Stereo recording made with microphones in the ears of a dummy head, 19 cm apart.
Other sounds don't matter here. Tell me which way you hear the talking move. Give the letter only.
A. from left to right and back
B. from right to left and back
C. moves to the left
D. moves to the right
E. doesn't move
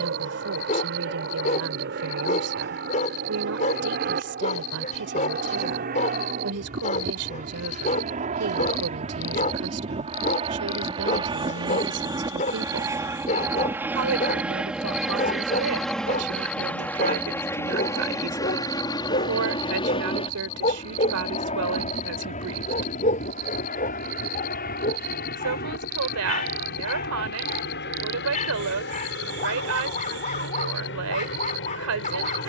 E.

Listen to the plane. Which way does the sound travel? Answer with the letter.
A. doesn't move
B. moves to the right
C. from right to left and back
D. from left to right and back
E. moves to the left
E.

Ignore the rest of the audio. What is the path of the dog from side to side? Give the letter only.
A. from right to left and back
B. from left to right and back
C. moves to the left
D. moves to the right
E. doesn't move
E.